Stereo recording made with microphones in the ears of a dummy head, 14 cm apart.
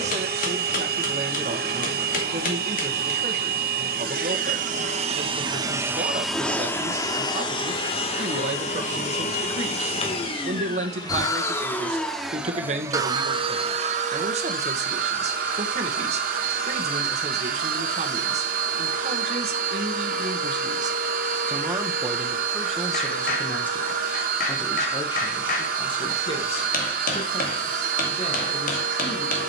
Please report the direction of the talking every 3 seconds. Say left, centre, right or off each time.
right, right, right, right, right, right, right, centre, left, left.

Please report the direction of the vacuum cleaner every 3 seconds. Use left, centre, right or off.
right, right, left, left, right, right, right, right, right, right.